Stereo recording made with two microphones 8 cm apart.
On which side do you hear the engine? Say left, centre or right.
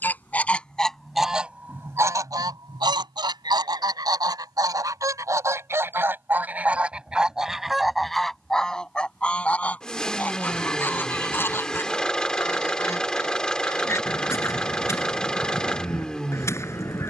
centre.